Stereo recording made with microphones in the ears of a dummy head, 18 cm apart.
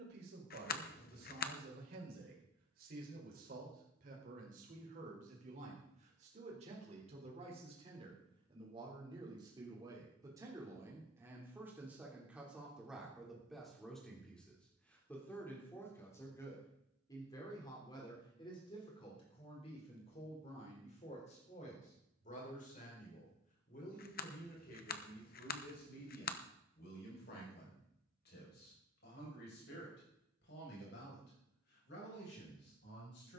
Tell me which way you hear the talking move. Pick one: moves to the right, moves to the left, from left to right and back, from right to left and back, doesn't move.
moves to the left.